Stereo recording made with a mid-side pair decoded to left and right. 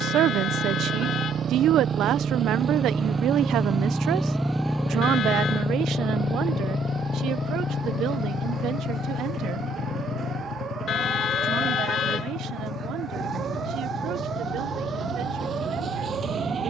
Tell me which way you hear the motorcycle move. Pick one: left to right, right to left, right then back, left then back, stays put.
right to left.